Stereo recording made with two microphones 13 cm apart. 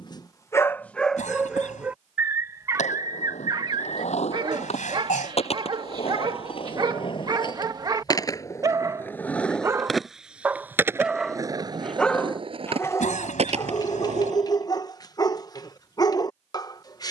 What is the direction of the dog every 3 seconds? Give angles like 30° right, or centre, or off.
centre, 40° right, 30° right, 10° right, 20° left, 30° left.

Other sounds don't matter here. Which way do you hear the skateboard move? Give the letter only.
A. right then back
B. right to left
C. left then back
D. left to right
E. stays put
D.